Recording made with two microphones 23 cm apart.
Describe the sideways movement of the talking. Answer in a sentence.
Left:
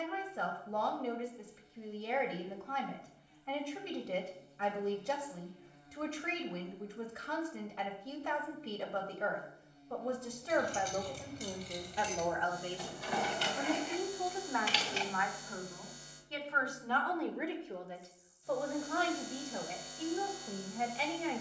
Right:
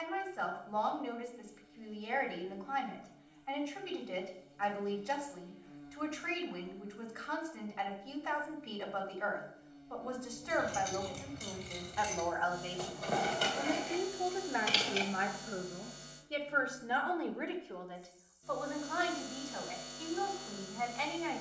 You can hear the talking move from left to right and back again.